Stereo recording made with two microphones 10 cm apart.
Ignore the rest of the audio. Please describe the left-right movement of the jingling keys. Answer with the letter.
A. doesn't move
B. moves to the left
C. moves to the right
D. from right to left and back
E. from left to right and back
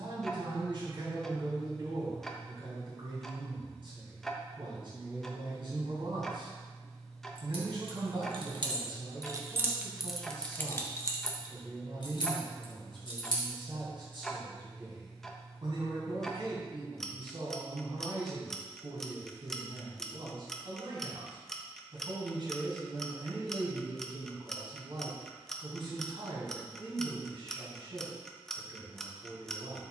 B.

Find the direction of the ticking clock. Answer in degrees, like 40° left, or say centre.
centre.